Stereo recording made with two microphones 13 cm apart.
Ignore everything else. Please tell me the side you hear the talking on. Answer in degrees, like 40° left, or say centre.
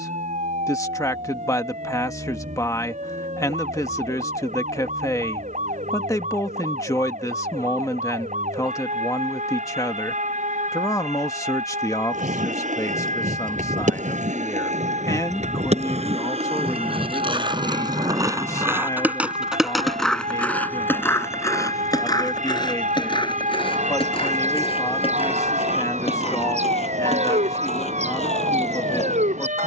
20° left.